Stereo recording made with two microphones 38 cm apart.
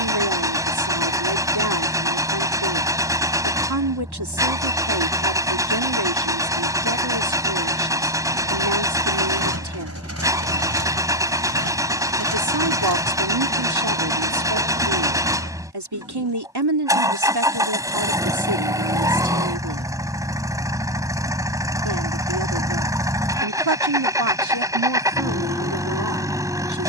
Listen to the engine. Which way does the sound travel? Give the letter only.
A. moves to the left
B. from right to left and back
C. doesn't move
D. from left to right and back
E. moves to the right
C.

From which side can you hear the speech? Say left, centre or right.
right.